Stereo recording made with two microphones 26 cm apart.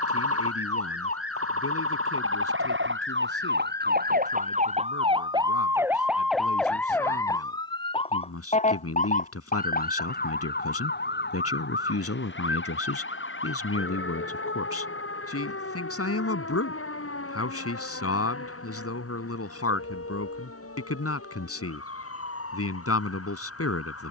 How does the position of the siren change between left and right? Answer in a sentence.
In this clip you hear the siren move to the left.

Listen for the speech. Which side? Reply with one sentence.
In this clip you hear the speech on the left.